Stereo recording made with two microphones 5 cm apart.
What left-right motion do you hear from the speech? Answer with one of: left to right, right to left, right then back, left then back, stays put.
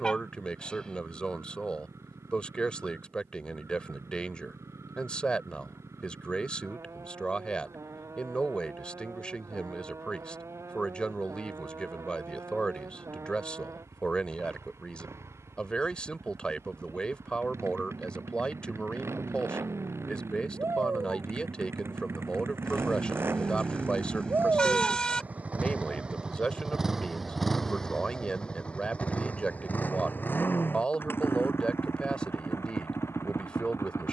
stays put.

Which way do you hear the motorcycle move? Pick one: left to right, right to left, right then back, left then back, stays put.
right to left.